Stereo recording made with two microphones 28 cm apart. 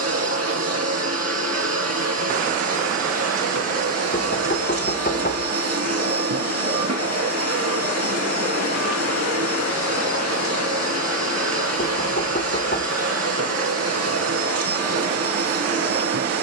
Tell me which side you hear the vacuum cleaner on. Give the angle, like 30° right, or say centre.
60° right.